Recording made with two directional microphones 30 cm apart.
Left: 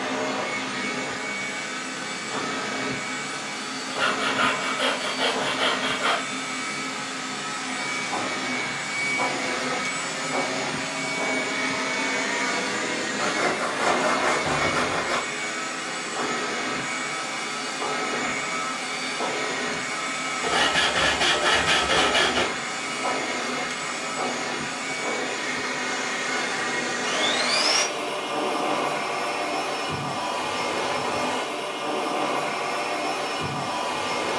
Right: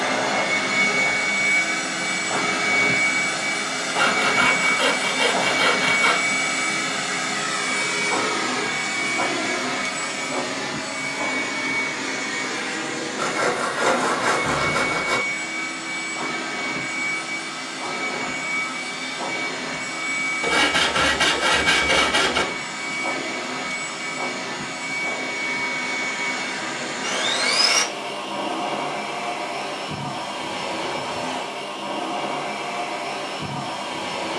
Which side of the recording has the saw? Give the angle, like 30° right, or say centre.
30° right.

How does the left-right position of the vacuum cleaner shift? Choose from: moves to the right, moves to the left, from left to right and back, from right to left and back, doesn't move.
moves to the left.